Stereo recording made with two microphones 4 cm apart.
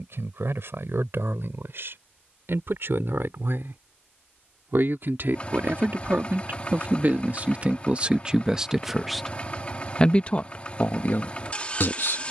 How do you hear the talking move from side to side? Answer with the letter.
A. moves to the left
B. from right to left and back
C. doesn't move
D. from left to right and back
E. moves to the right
A.